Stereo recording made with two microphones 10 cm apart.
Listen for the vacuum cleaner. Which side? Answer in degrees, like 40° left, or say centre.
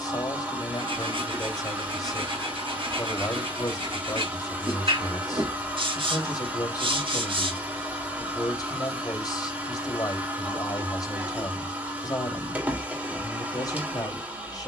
20° right.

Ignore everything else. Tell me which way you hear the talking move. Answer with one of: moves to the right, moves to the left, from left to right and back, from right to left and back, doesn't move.
doesn't move.